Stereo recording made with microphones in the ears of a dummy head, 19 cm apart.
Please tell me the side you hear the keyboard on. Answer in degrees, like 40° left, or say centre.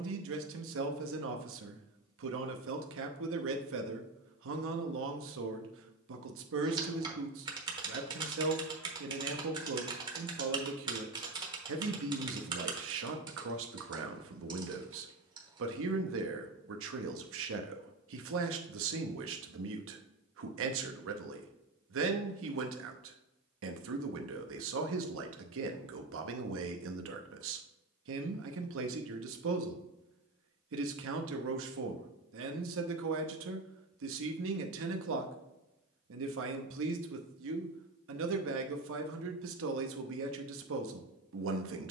20° right.